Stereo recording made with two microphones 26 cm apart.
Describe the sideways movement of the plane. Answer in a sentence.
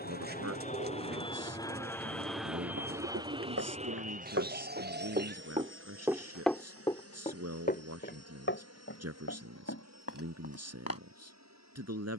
You can hear the plane travel towards the right.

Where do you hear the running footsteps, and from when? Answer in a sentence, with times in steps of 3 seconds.
In this clip you hear the running footsteps not at all from 0 s, on the right from 3 s and on the left from 6 s.